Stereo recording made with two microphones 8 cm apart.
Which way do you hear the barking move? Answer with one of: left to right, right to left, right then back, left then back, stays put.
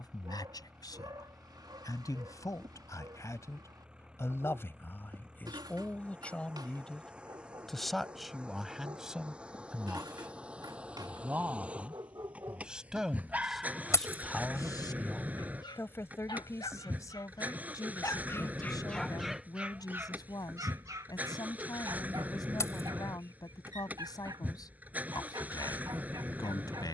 left then back.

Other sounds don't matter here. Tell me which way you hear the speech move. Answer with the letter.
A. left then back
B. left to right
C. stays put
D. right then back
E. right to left
D.